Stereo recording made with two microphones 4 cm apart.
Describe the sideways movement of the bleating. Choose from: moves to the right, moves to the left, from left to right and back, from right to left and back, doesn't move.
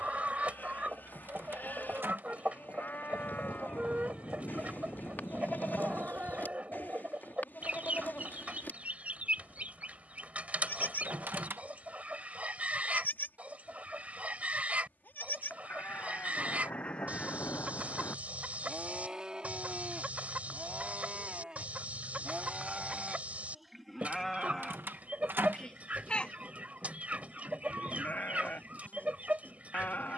from left to right and back.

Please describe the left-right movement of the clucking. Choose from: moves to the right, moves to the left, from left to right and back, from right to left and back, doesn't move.
doesn't move.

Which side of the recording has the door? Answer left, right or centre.
right.